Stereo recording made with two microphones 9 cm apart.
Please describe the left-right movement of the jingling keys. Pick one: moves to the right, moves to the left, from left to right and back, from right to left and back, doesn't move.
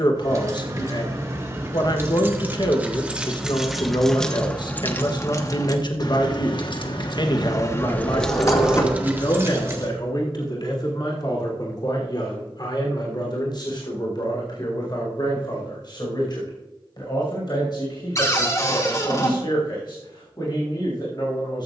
from right to left and back.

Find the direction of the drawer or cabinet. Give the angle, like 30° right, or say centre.
30° left.